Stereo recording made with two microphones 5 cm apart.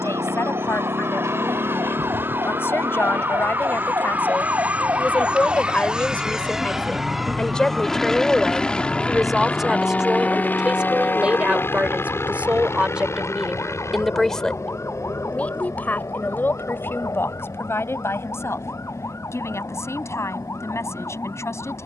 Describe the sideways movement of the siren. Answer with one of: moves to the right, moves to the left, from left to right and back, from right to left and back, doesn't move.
moves to the left.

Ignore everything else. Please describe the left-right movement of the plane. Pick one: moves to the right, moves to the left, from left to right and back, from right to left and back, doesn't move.
moves to the left.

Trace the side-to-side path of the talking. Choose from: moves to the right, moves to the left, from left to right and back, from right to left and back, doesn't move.
from left to right and back.